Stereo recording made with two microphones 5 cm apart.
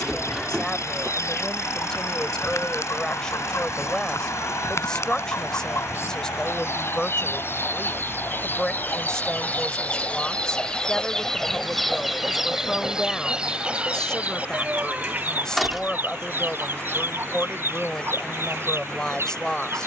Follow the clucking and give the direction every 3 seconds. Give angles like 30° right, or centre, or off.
70° left, 60° left, 50° left, 20° left, 20° right, 50° right, 60° right.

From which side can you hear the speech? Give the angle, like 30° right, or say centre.
10° left.